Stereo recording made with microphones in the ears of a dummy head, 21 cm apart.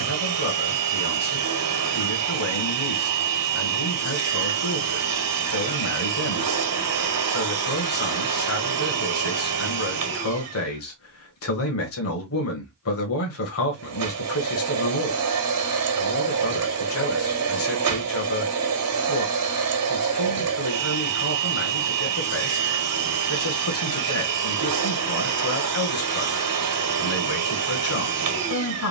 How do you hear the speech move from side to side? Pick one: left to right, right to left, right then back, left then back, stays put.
stays put.